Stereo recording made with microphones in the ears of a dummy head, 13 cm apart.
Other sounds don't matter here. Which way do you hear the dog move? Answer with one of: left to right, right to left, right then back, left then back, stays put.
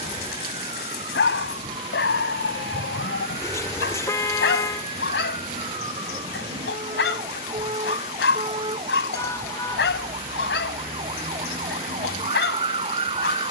stays put.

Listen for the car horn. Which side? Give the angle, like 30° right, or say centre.
20° left.